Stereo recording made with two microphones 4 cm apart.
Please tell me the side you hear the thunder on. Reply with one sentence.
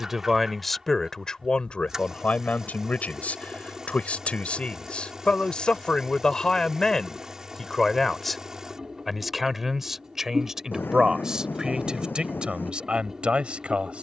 You can hear the thunder on the left.